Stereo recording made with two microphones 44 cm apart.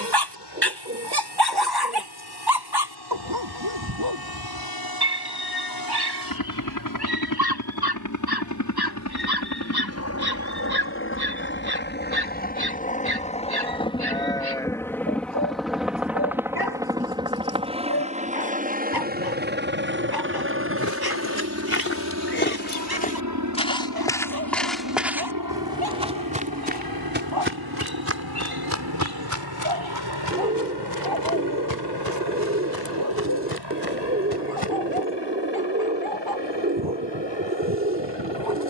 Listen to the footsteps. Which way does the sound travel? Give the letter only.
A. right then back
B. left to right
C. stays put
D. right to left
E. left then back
B.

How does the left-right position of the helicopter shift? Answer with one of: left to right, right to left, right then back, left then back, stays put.
left to right.